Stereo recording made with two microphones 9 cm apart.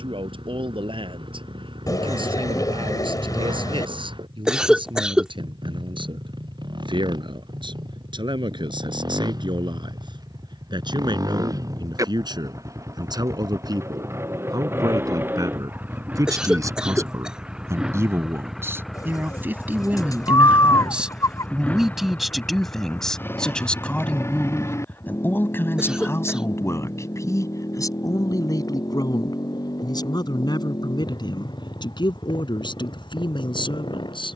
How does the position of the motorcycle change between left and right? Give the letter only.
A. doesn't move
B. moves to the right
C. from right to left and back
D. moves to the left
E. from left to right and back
D.